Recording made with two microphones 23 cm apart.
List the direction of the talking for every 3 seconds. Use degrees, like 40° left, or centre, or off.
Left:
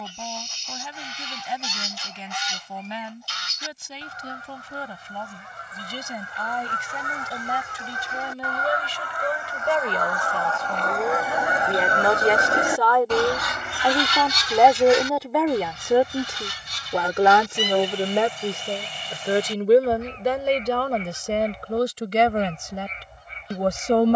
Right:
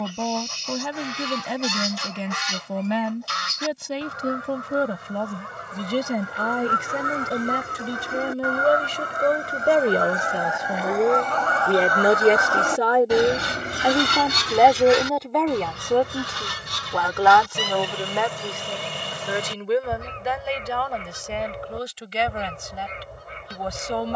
70° right, 70° right, 60° right, 40° right, 20° right, 10° left, 40° left, 50° left.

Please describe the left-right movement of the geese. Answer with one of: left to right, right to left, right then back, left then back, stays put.
left then back.